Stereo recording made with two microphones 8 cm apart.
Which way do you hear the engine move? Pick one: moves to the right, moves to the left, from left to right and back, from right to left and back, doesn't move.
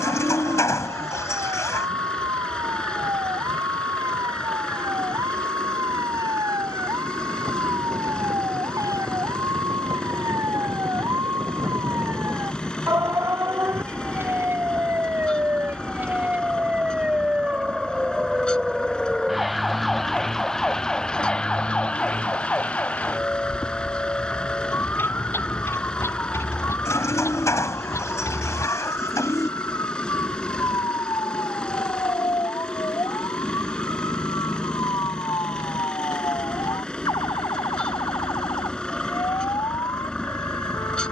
doesn't move.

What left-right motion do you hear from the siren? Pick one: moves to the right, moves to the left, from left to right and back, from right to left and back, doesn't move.
moves to the left.